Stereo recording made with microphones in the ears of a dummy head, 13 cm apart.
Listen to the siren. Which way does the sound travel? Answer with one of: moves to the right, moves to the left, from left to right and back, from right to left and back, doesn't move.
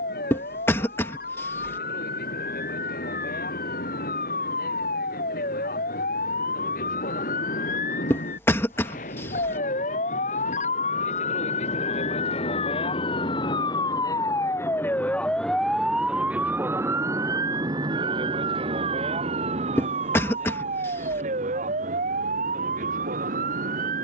moves to the right.